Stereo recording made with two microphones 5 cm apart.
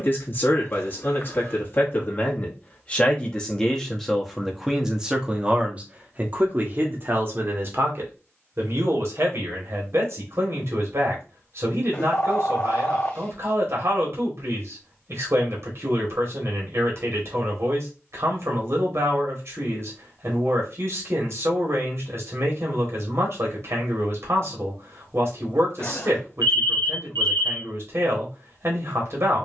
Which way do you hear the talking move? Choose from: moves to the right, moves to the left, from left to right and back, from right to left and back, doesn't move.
moves to the right.